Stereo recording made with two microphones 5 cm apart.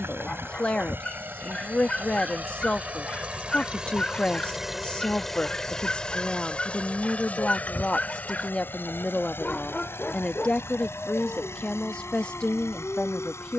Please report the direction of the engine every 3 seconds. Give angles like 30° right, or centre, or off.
40° right, 10° right, 30° left, 60° left, 60° left.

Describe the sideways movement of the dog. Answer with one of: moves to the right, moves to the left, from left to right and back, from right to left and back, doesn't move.
doesn't move.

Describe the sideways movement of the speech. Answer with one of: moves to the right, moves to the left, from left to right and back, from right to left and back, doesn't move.
doesn't move.